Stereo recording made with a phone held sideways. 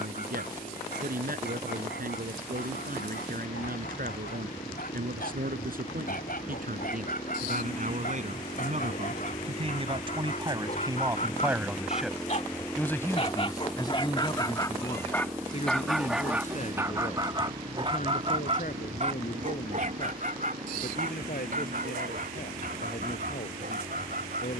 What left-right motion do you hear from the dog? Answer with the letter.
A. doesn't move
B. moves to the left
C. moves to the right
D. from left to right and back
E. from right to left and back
C.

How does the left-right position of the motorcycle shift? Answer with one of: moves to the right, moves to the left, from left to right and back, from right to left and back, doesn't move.
moves to the right.